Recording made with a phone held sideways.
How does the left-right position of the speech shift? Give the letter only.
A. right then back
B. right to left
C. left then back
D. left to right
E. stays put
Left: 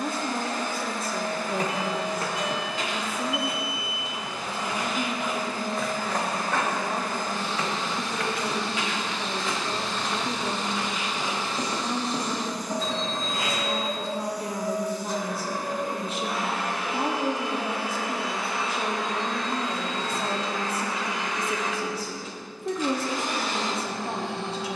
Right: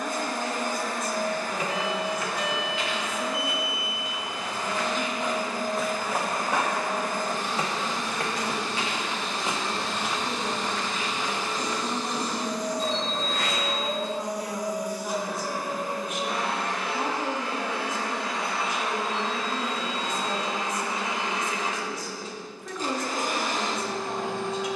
E.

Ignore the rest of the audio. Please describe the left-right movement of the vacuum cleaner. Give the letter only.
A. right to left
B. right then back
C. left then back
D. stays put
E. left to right
C.